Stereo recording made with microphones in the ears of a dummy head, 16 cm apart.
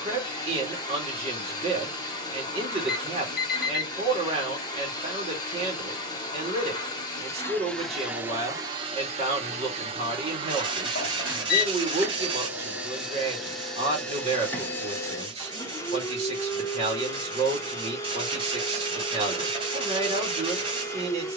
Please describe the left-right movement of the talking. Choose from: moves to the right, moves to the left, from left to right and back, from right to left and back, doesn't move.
doesn't move.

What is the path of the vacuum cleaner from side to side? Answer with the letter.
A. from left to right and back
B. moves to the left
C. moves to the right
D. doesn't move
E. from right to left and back
A.